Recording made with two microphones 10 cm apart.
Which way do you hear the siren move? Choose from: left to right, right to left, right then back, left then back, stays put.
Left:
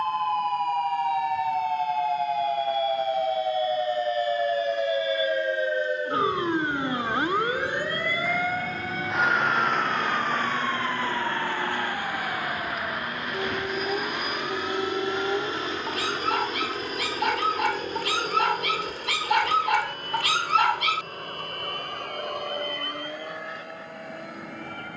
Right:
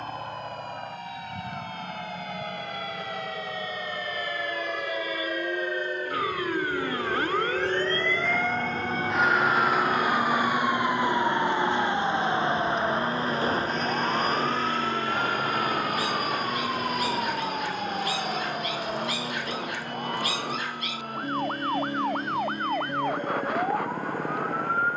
left to right.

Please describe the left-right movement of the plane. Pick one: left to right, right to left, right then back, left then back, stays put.
right to left.